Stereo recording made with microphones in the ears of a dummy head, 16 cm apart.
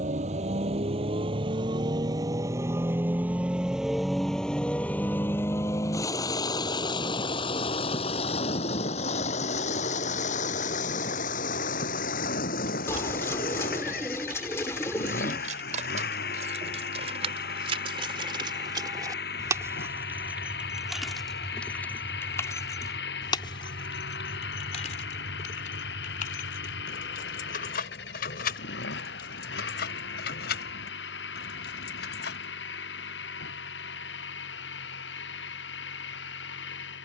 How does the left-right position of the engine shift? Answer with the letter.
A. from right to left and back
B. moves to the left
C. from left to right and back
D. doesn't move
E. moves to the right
B.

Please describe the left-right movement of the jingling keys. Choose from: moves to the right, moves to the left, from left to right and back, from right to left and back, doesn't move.
moves to the left.